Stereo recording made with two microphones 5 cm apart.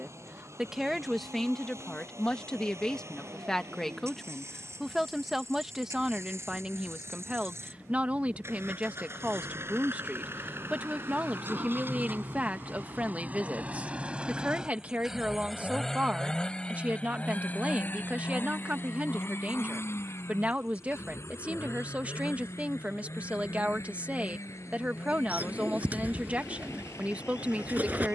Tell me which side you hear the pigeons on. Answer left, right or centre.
right.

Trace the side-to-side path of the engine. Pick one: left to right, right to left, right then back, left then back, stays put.
right to left.